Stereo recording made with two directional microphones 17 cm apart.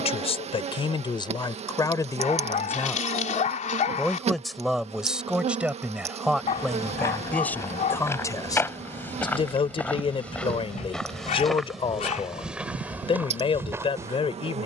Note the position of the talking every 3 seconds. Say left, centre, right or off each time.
left, centre, centre, left, left.